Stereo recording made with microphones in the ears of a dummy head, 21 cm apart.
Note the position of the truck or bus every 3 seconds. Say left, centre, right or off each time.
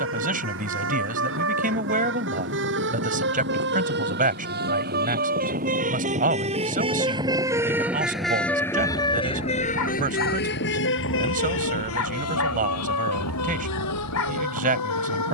right, right, centre, left, left.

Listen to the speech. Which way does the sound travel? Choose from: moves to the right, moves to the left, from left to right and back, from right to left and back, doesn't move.
doesn't move.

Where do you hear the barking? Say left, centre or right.
left.